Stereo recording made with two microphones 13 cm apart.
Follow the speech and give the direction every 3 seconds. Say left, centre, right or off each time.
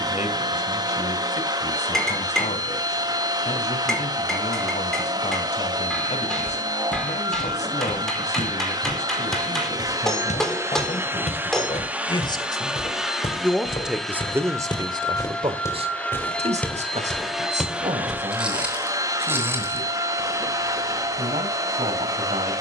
left, left, left, left, centre, right, right, right.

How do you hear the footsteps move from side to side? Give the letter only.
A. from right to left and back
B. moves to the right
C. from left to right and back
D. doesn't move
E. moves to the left
B.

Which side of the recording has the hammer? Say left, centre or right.
centre.